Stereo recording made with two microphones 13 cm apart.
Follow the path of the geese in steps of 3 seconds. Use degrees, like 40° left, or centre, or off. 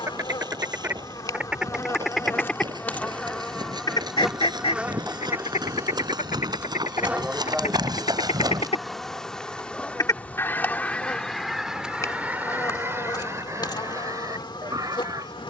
10° right, 50° left, 60° left, 10° left, 20° right.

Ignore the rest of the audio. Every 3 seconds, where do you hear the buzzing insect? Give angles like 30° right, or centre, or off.
30° left, centre, 10° right, 10° left, 30° left.